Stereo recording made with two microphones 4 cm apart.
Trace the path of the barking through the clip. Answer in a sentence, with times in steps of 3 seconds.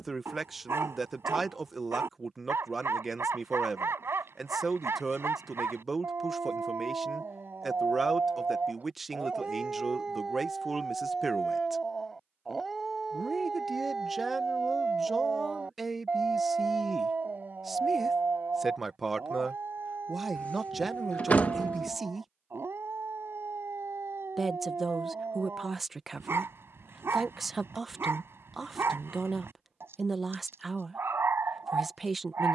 In this clip you hear the barking on the right from 0 s, in the centre from 9 s and on the right from 15 s.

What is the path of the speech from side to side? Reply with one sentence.
You can hear the speech stay put.